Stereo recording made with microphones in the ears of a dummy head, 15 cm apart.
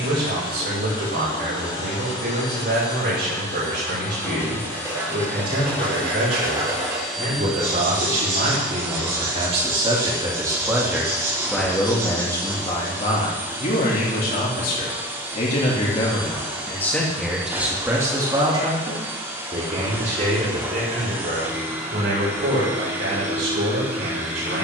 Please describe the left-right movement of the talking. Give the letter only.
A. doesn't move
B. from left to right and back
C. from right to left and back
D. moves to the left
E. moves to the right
C.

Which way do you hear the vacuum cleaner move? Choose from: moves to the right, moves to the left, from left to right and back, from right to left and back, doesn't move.
moves to the right.